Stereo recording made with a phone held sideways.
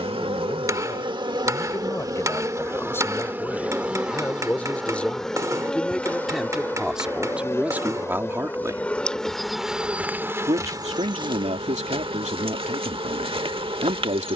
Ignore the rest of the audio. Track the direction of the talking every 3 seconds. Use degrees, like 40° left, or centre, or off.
20° left, 10° left, 10° right, 60° right, 60° right.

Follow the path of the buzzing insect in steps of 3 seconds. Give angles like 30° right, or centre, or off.
30° right, centre, 20° left, 20° right, 40° right.